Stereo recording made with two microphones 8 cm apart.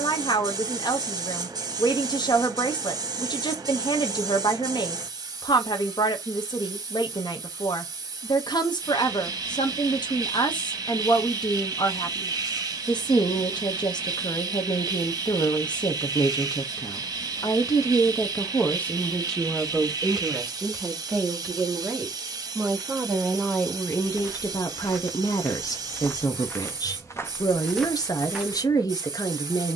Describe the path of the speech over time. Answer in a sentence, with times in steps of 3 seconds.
You can hear the speech on the left from 0 s, in the centre from 18 s and on the left from 24 s.